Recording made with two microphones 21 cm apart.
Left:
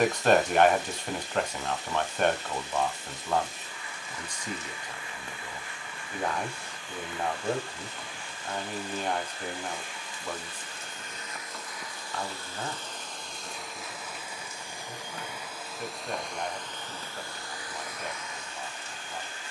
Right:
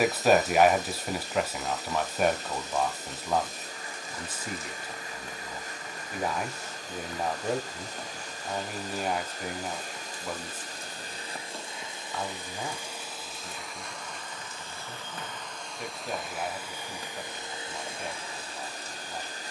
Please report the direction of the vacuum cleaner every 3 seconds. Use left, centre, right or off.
right, right, right, right, centre, centre, right.